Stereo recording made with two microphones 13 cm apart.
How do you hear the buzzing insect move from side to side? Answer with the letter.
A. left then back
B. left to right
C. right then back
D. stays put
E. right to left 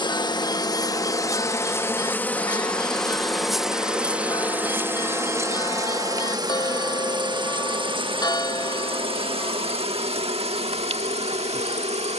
B.